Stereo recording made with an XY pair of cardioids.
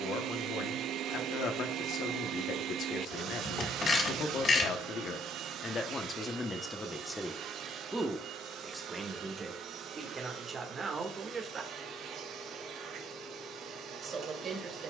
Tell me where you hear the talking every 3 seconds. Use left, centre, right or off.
left, left, centre, right, right.